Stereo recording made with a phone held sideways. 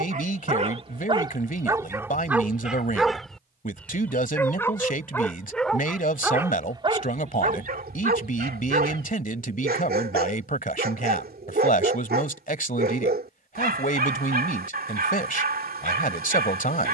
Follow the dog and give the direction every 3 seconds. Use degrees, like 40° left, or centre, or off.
20° right, 10° left, 50° right, 70° right, 70° right, 70° right.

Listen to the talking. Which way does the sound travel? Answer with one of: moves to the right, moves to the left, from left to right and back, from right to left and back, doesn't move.
doesn't move.